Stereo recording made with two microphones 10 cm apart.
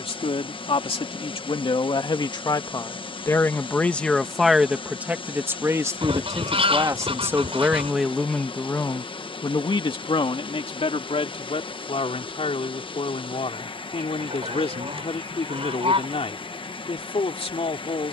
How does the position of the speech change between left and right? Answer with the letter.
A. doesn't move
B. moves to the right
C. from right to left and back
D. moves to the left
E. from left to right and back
E.